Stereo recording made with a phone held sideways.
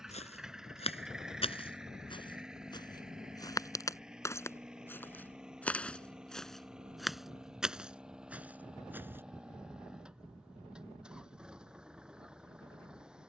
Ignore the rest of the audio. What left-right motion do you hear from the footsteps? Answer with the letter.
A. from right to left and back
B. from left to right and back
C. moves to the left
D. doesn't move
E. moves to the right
E.